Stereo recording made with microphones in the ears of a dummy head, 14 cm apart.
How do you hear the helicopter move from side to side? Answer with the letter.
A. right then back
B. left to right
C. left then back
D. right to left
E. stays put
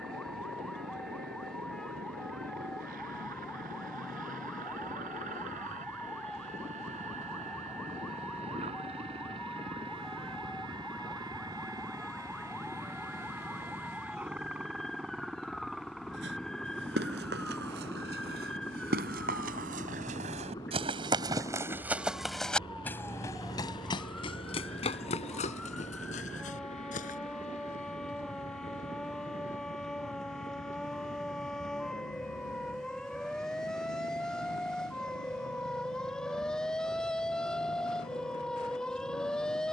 D.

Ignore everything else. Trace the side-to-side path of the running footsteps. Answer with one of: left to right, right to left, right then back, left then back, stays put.
right to left.